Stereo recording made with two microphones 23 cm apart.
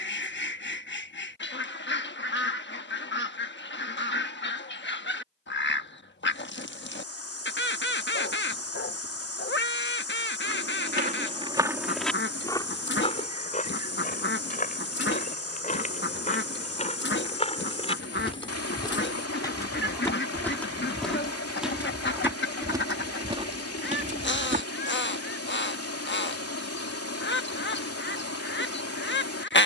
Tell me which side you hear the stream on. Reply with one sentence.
In this clip you hear the stream on the left.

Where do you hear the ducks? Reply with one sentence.
You can hear the ducks on the left.